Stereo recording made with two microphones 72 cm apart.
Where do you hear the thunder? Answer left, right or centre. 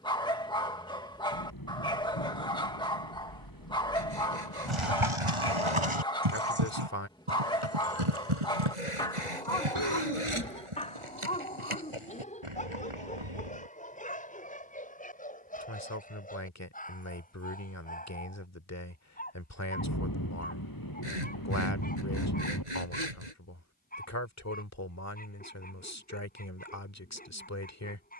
left.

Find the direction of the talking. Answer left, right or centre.
left.